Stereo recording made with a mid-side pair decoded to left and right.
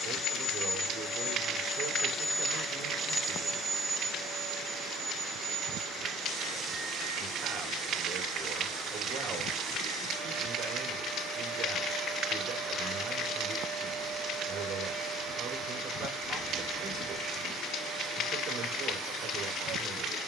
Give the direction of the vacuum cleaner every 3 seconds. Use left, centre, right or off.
left, right, right, right, right, right, right.